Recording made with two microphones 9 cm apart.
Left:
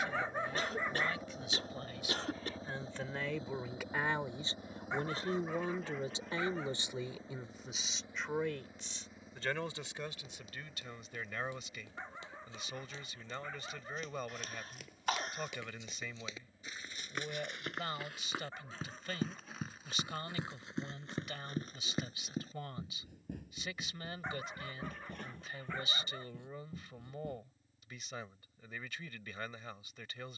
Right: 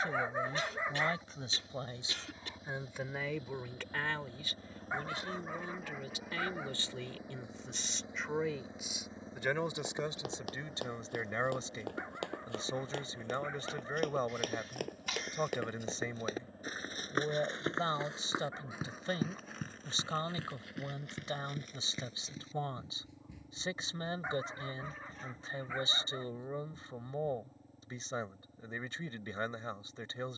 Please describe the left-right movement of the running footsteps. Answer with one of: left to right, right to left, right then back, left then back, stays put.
right to left.